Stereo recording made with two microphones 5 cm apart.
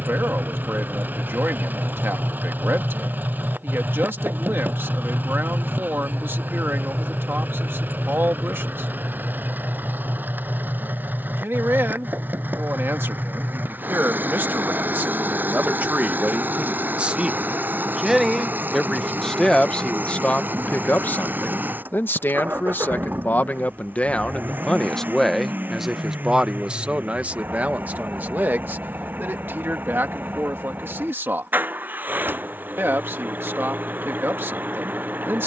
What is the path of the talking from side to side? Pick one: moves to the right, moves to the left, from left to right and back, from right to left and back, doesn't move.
from right to left and back.